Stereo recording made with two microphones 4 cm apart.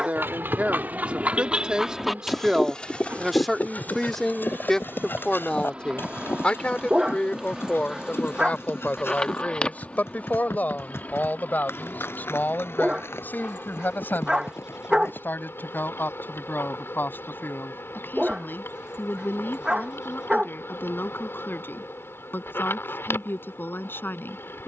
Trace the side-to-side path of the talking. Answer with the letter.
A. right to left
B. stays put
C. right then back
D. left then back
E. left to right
A.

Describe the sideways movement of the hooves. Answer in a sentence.
In this clip you hear the hooves travel towards the left.